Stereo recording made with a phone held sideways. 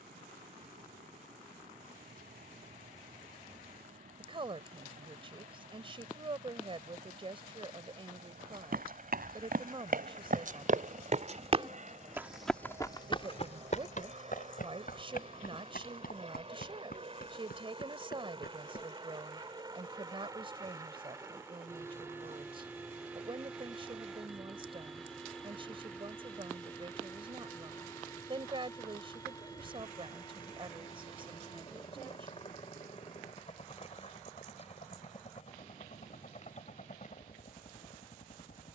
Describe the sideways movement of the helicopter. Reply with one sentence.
In this clip you hear the helicopter move to the left.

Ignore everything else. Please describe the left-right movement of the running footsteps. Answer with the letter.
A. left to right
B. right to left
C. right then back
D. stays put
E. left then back
B.